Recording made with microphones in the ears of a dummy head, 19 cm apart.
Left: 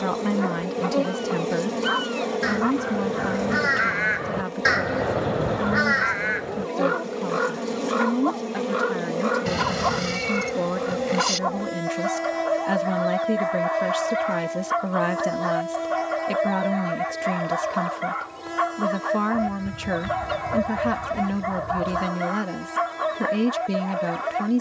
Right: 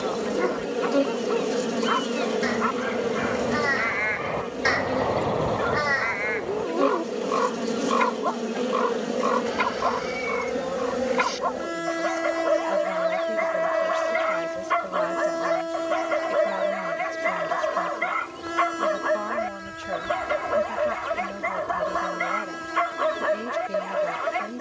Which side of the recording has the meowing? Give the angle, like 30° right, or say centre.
60° left.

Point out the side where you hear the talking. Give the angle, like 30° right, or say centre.
70° left.